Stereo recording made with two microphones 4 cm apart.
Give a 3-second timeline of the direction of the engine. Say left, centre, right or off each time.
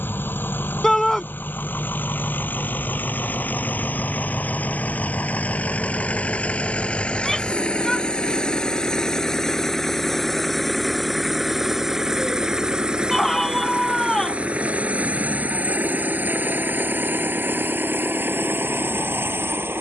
left, left, left, centre, right, right, right.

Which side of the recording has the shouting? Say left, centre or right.
centre.